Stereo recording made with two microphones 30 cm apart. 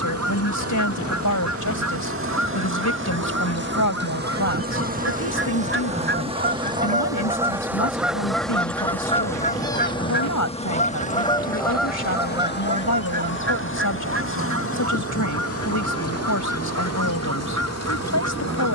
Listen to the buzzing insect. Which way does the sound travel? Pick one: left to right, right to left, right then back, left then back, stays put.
right to left.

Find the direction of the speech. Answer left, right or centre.
left.